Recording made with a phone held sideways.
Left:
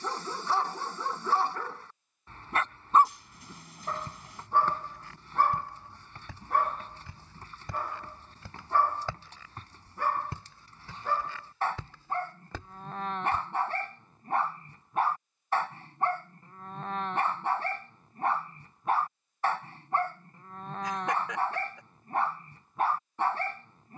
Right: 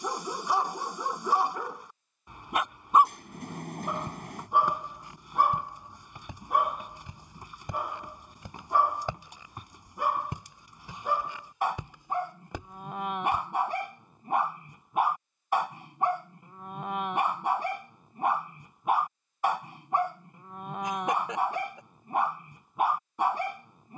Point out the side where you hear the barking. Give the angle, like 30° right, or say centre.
10° right.